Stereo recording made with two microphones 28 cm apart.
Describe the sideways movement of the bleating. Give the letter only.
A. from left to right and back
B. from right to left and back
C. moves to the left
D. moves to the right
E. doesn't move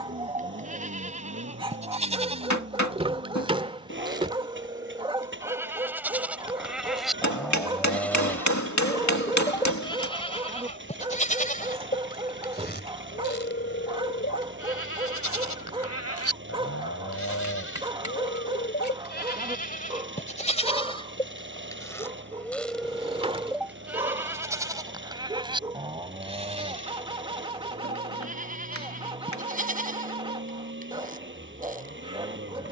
B.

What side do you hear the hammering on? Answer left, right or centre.
left.